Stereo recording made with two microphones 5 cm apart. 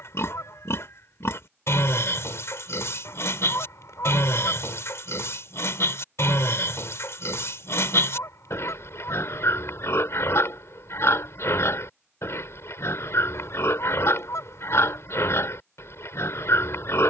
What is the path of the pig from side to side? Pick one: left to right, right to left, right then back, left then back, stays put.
stays put.